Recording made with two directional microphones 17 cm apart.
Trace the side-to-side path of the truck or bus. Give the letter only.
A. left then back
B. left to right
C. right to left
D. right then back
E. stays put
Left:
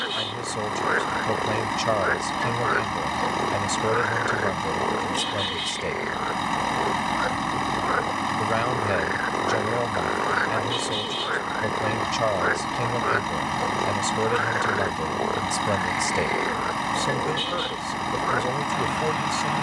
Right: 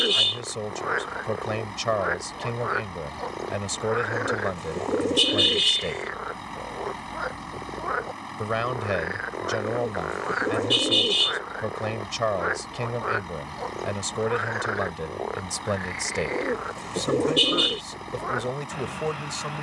E.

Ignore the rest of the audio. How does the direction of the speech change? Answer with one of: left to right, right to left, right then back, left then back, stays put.
stays put.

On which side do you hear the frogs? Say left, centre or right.
centre.